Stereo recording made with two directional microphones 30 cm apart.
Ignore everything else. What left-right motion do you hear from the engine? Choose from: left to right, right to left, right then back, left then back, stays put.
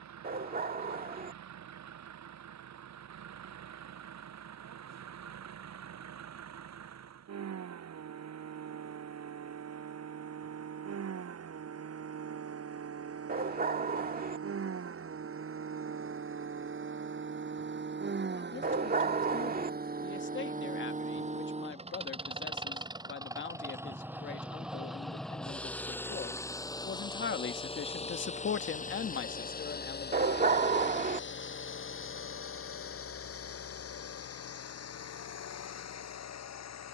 right to left.